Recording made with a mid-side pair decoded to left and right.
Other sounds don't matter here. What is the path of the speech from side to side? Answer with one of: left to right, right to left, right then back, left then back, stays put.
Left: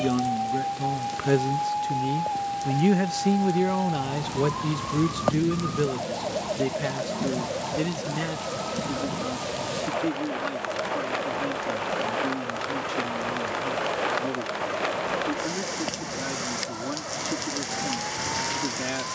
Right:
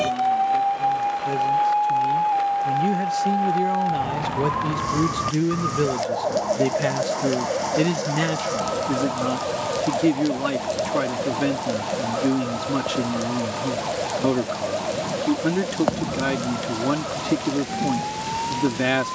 left to right.